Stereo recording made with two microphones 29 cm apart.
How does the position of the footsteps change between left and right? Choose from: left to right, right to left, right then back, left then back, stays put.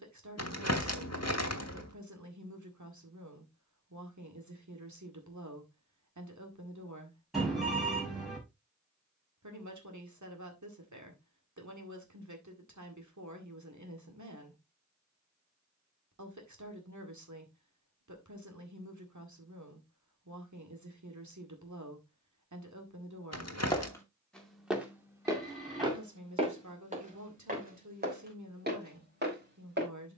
left to right.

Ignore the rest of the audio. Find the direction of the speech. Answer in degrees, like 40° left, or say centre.
80° right.